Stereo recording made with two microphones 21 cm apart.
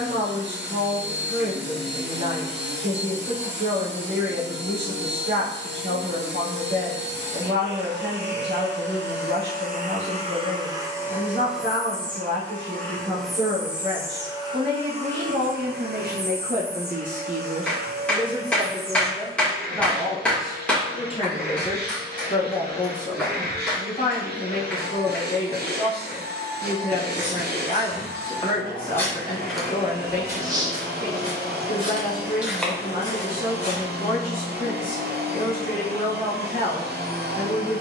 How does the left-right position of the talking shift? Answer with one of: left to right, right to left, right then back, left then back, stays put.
right to left.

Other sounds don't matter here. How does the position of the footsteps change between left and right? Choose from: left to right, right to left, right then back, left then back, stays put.
right then back.